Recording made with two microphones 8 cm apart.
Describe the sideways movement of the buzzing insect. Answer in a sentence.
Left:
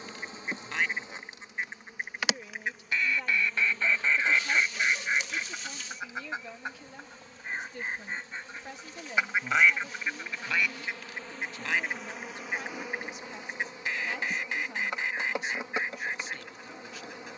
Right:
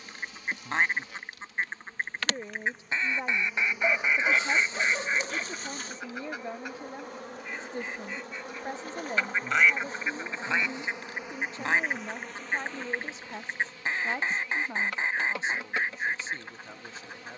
In this clip you hear the buzzing insect move from left to right and back again.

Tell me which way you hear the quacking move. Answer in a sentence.
You can hear the quacking go left and come back.